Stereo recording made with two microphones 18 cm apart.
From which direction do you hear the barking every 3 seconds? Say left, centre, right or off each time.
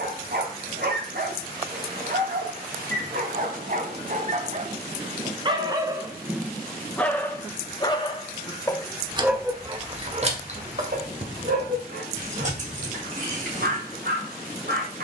right, right, centre, right, right.